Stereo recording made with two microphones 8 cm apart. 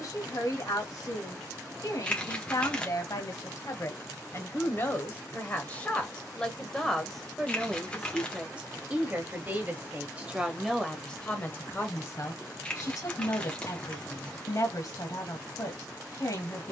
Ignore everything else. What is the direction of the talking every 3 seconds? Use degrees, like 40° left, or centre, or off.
60° left, 40° left, centre, centre, 50° left, 50° left.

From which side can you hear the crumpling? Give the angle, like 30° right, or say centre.
20° left.